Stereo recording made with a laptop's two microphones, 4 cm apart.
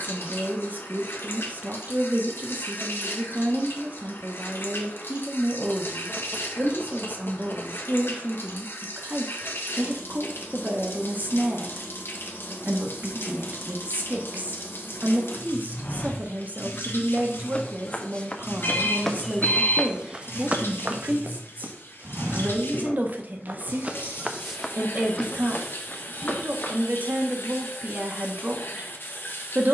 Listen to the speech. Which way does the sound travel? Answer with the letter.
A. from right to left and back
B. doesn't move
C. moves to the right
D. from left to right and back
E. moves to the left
B.